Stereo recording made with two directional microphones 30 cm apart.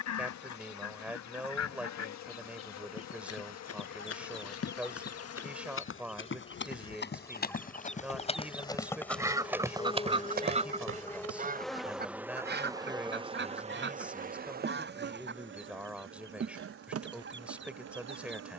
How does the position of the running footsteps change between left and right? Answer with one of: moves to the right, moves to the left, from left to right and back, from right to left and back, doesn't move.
moves to the right.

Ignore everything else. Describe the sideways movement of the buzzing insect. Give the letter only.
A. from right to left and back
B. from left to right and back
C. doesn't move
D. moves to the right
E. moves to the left
D.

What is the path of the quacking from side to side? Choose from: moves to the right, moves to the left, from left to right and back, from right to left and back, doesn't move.
moves to the right.